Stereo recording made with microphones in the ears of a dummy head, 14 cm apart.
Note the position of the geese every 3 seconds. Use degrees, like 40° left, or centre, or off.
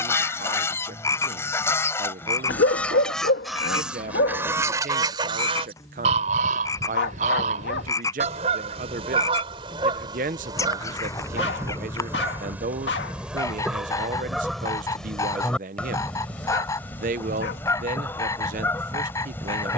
10° left, 10° right, 50° right, 30° right, 10° right, 10° left, 10° left.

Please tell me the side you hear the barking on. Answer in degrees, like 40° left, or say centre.
80° left.